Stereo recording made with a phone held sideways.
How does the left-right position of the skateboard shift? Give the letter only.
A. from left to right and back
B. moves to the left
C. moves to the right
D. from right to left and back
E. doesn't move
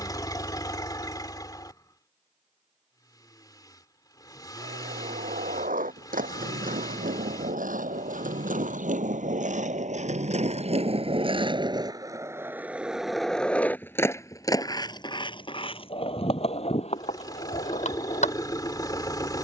B.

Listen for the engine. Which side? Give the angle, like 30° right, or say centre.
30° left.